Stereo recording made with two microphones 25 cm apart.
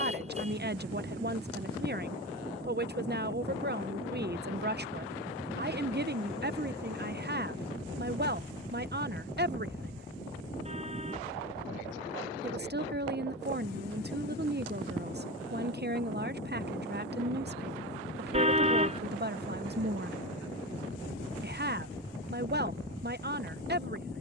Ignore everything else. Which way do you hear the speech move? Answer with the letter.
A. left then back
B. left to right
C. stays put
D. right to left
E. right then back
C.